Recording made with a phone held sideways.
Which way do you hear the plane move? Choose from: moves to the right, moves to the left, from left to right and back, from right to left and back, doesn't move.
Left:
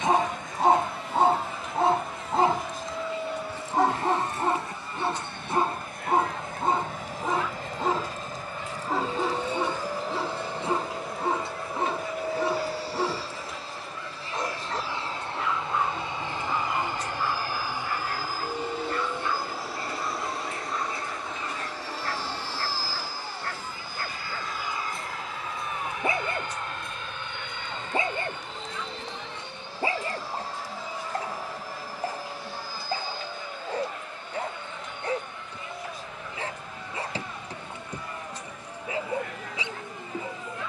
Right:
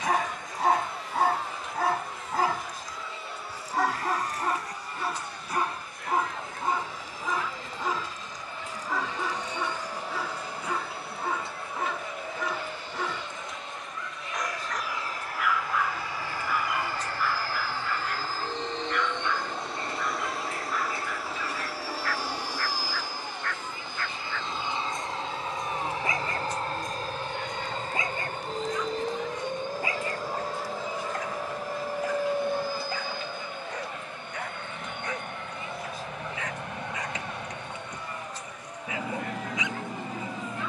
moves to the right.